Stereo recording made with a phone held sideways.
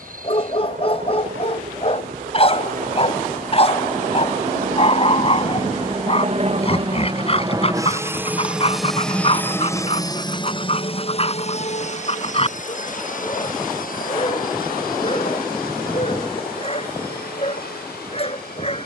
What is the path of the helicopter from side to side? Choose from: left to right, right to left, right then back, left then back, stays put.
right to left.